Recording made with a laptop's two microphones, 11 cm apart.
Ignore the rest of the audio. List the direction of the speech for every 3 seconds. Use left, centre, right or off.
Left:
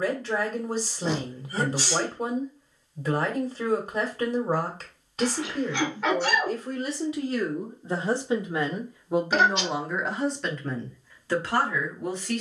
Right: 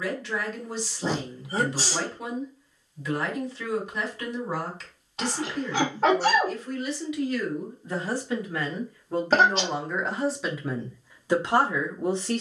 left, left, left, centre.